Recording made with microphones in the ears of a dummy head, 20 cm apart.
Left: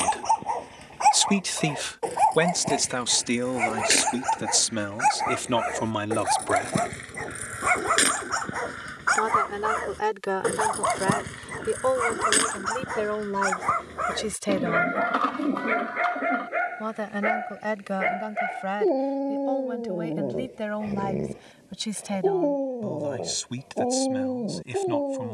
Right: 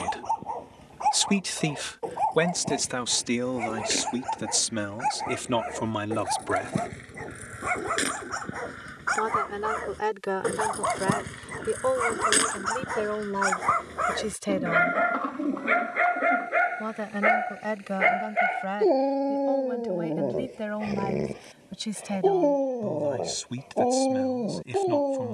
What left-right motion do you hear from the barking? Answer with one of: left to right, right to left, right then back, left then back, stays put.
left to right.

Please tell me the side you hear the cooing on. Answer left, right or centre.
left.